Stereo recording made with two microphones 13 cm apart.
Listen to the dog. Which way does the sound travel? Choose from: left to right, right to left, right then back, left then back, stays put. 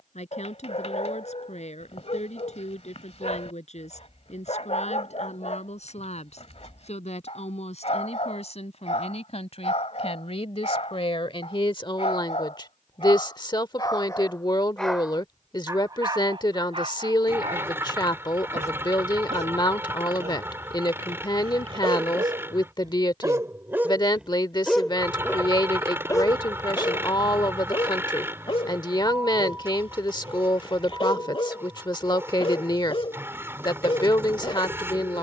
right then back.